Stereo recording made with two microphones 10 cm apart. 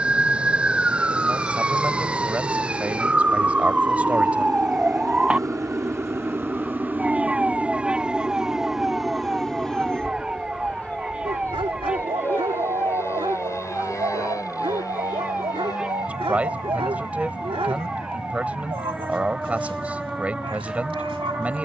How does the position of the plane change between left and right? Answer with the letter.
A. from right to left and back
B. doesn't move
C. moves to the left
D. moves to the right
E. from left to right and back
C.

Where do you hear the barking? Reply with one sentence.
You can hear the barking on the right.